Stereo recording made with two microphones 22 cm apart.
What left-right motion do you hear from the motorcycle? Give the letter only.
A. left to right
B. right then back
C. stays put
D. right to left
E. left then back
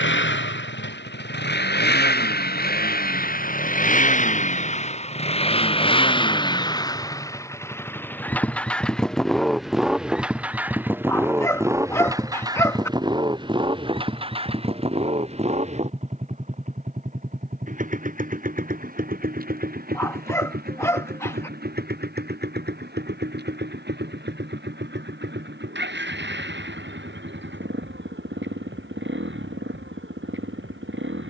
A.